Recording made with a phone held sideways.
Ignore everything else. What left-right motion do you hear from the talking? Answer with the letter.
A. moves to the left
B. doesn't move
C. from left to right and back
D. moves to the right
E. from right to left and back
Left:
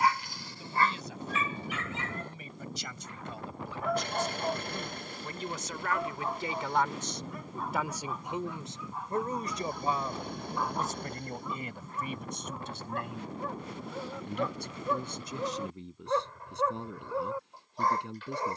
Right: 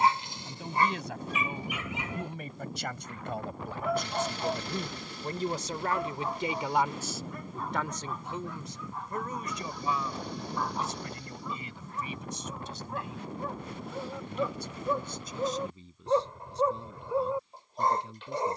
A.